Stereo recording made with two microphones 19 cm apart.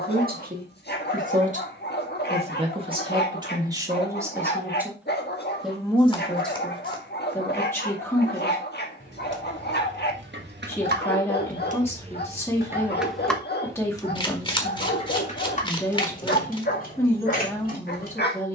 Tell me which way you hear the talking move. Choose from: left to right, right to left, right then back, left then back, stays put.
right to left.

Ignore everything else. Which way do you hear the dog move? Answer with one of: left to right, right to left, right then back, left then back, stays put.
stays put.